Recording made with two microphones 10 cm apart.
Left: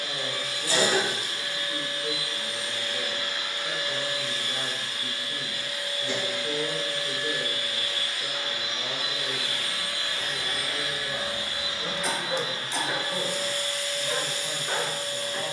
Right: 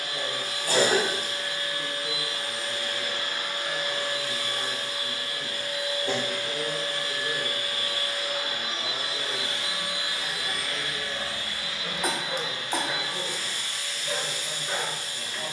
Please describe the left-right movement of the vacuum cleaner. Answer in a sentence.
You can hear the vacuum cleaner move from right to left.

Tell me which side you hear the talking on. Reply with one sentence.
You can hear the talking on the left.